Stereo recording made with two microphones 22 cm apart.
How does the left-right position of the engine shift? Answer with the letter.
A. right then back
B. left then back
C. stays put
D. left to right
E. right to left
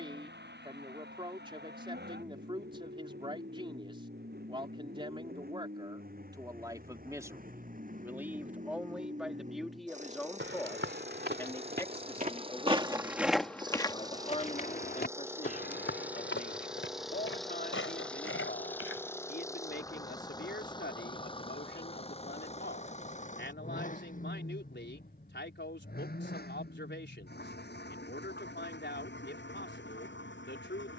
E.